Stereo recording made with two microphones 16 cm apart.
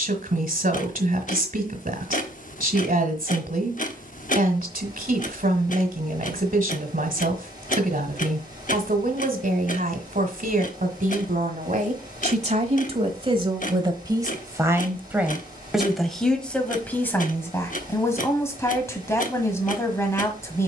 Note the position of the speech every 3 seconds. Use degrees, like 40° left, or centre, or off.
60° right, 60° right, 60° right, 60° right, 30° right, 10° left, 20° left.